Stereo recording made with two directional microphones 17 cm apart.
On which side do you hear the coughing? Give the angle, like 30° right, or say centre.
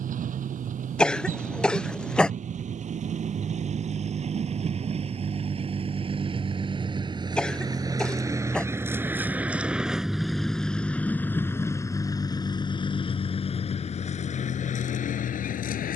centre.